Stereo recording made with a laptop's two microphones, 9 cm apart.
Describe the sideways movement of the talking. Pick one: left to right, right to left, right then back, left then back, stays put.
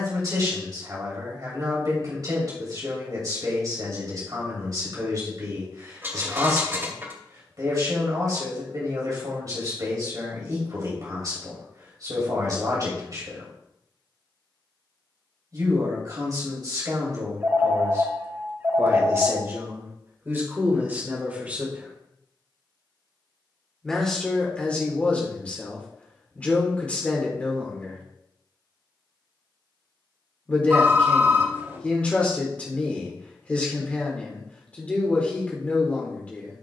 right to left.